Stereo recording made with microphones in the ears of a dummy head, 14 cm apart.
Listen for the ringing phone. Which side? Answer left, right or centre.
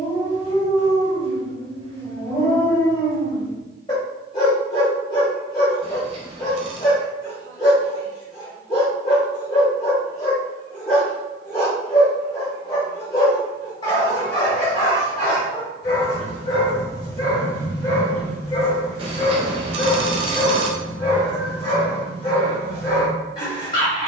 right.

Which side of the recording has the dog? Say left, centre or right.
left.